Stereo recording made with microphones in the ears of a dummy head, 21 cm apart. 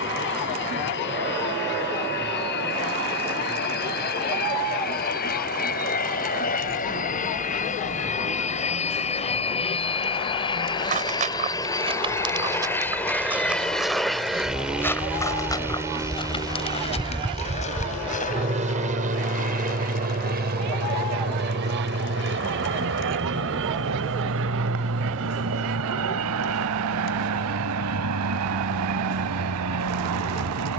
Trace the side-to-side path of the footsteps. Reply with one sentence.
You can hear the footsteps move to the left.